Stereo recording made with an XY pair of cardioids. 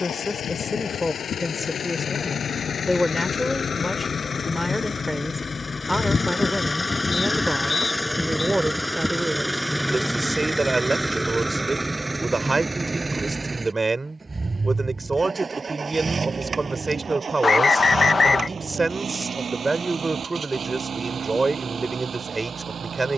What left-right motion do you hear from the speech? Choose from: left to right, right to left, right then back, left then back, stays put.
left to right.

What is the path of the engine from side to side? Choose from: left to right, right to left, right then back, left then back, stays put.
left to right.